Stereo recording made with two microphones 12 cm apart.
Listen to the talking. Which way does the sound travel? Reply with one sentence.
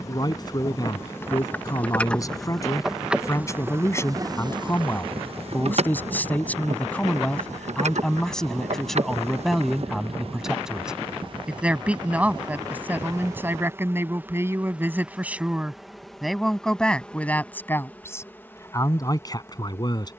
In this clip you hear the talking go right and come back.